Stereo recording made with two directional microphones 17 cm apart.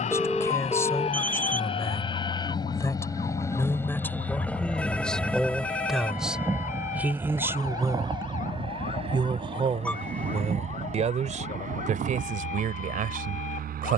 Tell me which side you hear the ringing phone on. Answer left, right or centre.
centre.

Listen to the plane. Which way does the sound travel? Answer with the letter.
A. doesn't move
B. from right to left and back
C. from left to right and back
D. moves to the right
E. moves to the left
D.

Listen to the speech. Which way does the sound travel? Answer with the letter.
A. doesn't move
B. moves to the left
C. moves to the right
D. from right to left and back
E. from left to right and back
C.